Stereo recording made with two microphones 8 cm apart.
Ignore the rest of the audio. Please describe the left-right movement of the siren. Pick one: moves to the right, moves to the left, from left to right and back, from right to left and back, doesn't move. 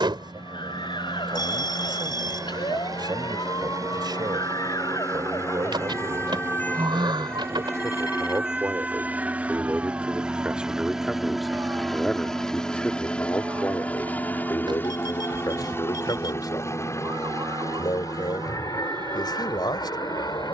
moves to the right.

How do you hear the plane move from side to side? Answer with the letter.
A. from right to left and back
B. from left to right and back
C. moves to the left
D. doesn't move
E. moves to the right
C.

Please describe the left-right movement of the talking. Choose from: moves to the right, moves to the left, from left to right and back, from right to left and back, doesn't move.
moves to the left.